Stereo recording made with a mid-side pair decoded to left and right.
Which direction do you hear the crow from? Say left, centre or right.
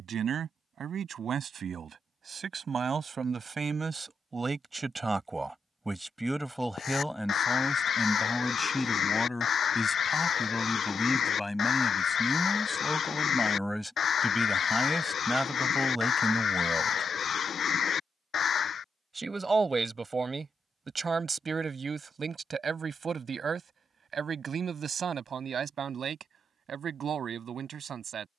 left.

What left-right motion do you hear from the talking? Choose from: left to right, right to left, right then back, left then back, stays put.
left then back.